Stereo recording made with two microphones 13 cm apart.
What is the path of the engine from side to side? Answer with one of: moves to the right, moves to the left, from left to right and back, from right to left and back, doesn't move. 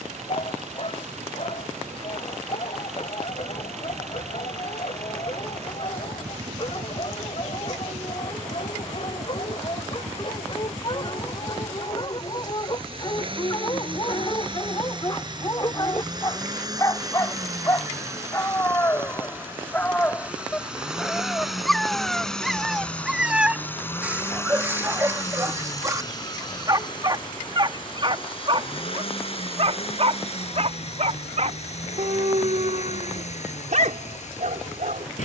moves to the left.